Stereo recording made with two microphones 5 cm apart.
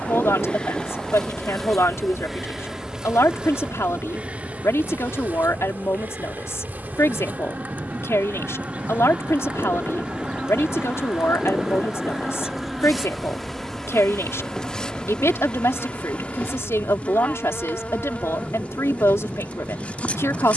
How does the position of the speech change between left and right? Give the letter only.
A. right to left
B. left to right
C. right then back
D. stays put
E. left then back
D.